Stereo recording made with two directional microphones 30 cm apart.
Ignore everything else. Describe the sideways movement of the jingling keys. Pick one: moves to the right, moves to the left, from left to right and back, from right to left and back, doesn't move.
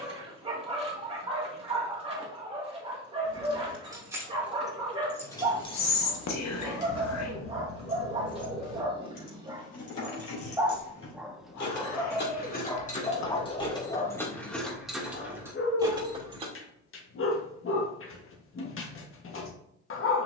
from right to left and back.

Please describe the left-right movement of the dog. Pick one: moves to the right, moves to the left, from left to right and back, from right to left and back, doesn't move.
moves to the left.